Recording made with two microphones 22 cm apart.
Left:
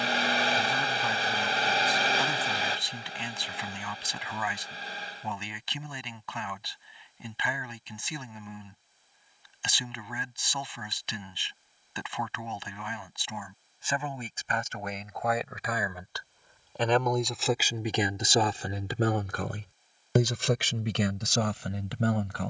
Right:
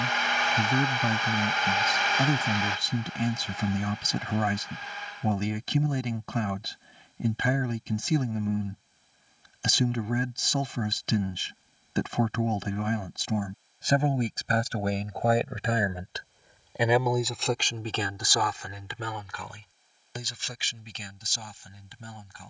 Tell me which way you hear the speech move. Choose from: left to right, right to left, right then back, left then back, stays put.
right to left.